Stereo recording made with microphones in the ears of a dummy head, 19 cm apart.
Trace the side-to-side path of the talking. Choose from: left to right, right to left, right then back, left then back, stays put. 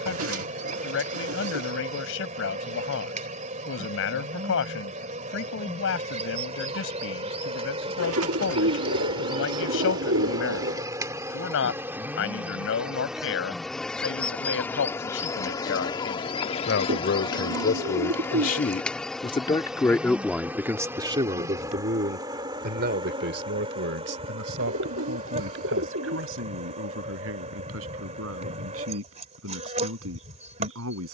left to right.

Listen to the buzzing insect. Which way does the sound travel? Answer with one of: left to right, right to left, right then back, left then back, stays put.
left then back.